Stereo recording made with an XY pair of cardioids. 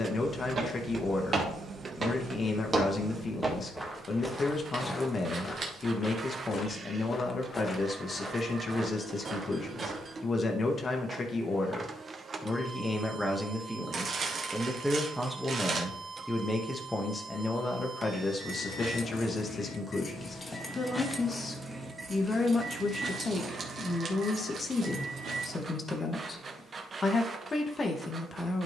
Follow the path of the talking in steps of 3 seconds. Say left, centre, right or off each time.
left, left, left, left, centre, centre, left, left, left, left.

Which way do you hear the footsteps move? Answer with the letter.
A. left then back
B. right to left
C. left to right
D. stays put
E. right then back
A.